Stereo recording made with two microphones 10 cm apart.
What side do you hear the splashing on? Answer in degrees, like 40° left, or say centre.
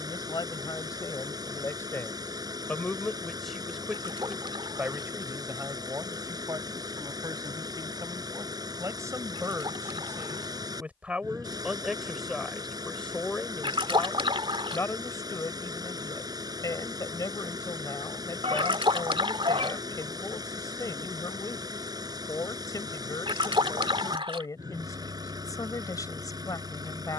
60° right.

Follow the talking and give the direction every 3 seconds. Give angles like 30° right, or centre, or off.
30° left, 10° right, 40° right, 20° right, 10° left, 40° left, 40° left, 40° left, 40° left.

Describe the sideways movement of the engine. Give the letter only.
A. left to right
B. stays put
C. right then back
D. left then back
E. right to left
B.